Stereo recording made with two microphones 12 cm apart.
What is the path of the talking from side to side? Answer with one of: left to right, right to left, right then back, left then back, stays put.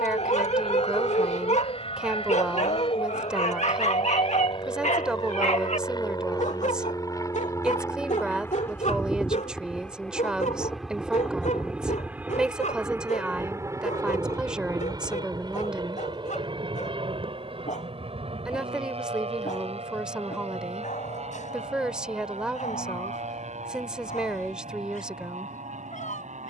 stays put.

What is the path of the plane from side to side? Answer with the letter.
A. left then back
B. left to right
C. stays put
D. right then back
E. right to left
B.